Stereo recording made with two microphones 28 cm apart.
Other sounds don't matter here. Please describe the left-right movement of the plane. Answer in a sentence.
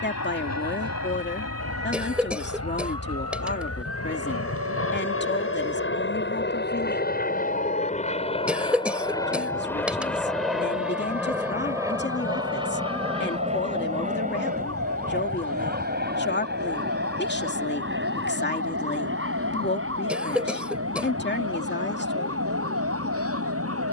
In this clip you hear the plane travel towards the right.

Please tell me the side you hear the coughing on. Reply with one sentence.
You can hear the coughing in the centre.